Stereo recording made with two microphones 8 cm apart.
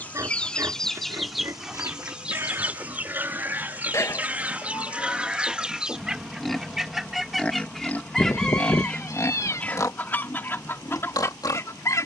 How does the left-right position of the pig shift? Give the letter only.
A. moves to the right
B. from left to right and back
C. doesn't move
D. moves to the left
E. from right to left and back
D.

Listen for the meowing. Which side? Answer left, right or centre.
left.